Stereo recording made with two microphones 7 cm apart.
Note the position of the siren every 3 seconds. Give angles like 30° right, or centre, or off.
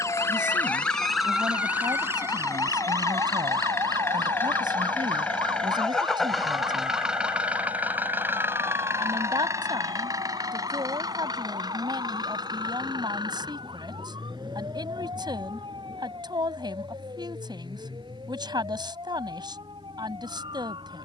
10° right, 60° right, 70° right, 80° right, 80° right, 80° right, 80° right.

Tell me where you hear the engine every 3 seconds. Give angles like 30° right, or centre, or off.
50° left, 20° left, 20° right, 50° right, 60° right, 70° right, 80° right.